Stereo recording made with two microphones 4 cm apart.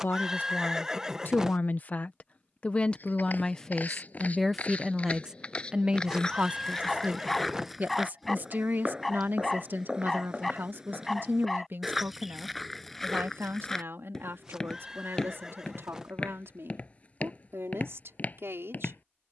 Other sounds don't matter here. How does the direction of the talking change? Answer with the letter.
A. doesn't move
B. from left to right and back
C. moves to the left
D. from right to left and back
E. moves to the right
E.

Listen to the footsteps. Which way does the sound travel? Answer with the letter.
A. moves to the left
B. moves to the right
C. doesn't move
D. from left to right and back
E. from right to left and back
D.